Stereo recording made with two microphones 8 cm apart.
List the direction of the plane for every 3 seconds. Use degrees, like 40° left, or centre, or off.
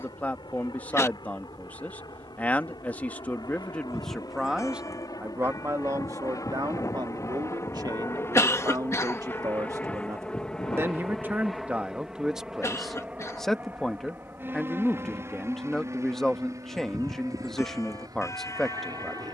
70° left, 50° left, 40° left, 10° left, 20° right, 40° right, 50° right.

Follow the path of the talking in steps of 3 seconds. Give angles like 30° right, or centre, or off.
20° left, centre, 50° right, 30° right, centre, 10° left, 10° left.